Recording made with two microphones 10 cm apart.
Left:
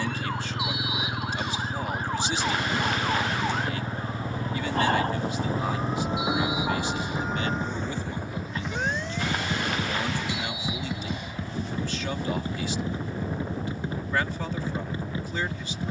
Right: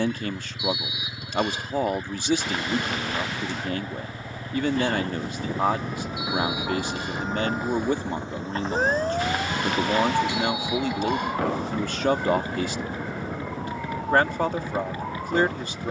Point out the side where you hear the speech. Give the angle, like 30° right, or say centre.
50° right.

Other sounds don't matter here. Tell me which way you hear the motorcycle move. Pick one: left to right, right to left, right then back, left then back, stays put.
stays put.